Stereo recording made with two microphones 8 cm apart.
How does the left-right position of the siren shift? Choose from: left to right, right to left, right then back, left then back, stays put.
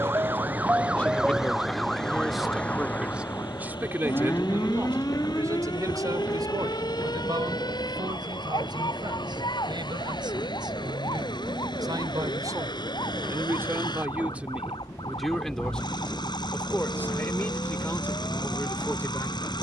right to left.